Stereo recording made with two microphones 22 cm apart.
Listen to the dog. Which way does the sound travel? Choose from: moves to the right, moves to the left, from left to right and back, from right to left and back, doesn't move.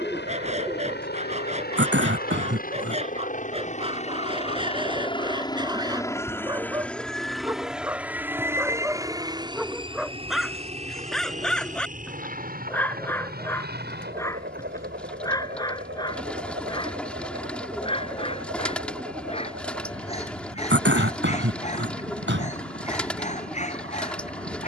moves to the left.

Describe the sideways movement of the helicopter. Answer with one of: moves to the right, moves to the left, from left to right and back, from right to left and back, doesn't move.
moves to the right.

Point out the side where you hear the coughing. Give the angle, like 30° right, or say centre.
60° right.